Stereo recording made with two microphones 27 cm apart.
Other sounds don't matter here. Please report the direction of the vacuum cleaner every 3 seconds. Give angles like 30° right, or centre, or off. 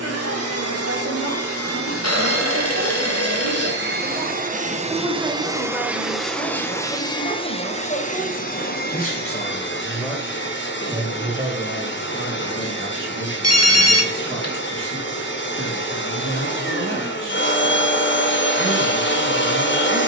60° right, 30° right, 20° left, 40° left, 50° left, 50° left, 50° left.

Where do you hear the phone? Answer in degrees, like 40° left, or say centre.
80° left.